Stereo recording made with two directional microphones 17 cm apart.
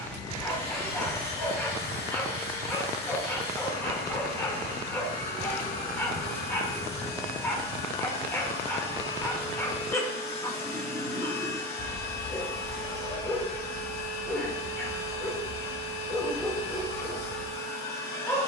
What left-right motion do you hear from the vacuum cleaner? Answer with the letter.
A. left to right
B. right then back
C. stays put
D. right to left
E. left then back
C.